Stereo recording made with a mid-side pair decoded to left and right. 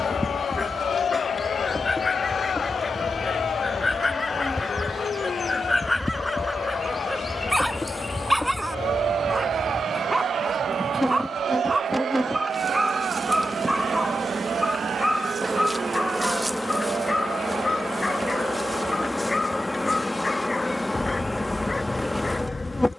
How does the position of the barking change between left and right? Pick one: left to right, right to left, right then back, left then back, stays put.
right then back.